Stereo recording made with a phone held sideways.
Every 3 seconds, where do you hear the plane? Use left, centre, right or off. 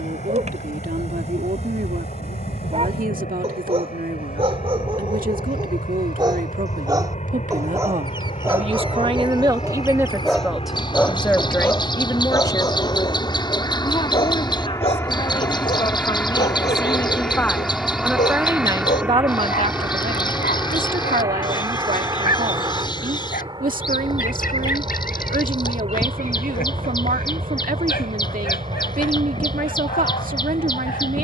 left, left, left, left, left, centre, centre, right, right, right, right.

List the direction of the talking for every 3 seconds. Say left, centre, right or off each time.
right, right, right, centre, left, left, right, right, right, right, right.